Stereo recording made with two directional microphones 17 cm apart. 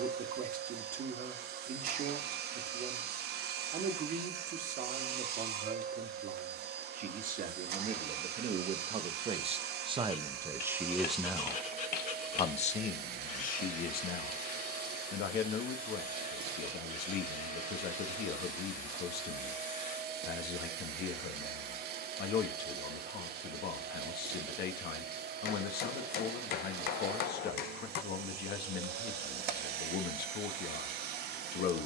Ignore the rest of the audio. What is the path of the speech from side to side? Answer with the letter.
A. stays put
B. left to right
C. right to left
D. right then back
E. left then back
C.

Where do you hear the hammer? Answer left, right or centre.
left.